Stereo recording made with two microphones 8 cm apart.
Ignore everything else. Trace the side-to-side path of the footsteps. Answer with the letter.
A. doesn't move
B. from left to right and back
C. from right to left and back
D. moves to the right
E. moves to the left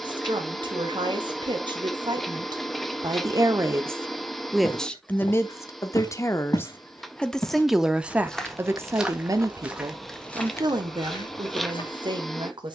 B.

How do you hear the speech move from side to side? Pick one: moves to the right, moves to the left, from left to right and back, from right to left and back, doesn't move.
from right to left and back.